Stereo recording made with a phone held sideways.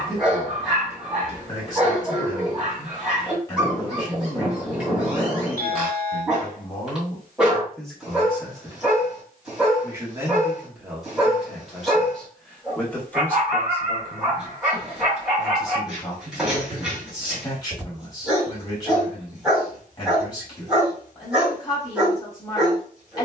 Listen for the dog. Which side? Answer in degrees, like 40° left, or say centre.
centre.